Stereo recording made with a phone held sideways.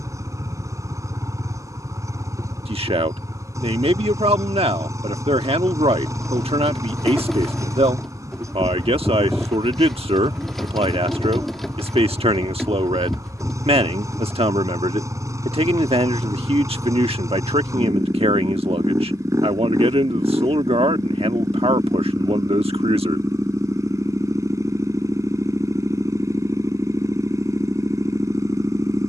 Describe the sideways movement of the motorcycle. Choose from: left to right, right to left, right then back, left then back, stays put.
stays put.